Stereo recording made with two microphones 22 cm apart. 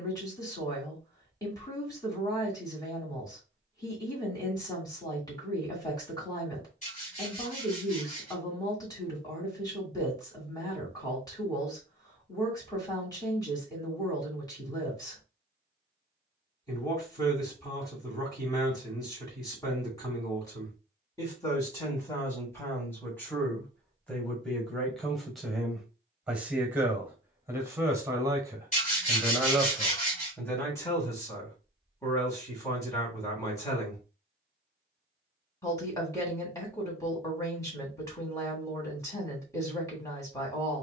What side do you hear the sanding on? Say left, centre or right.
left.